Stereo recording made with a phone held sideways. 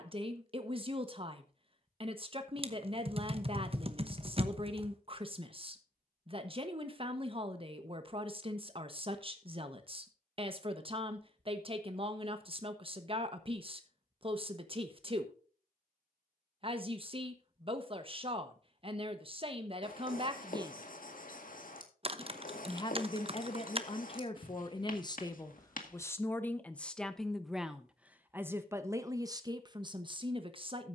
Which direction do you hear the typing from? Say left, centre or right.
right.